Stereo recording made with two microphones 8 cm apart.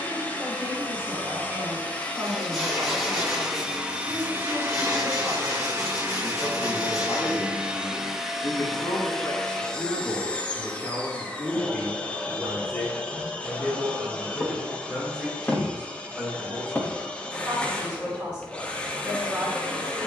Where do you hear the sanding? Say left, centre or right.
centre.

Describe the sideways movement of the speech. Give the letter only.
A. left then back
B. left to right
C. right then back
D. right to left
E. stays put
A.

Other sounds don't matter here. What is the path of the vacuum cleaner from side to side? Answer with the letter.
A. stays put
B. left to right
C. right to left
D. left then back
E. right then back
E.